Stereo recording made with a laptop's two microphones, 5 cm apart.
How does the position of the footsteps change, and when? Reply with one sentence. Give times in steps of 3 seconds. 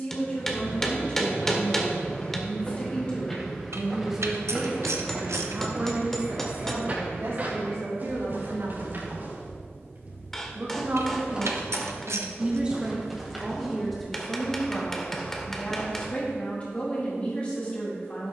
You can hear the footsteps on the left from 0 s, in the centre from 3 s, on the right from 6 s, in the centre from 12 s and on the left from 15 s.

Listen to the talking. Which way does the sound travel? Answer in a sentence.
In this clip you hear the talking go right and come back.